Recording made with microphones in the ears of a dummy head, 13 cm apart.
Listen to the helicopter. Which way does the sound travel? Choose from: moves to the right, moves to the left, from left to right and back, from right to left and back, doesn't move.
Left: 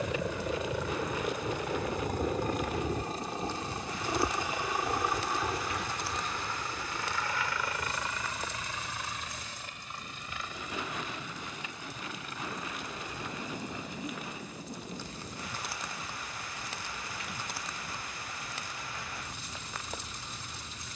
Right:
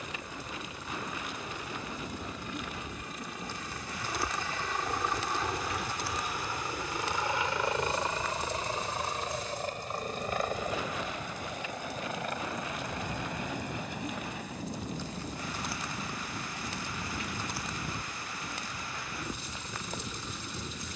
moves to the right.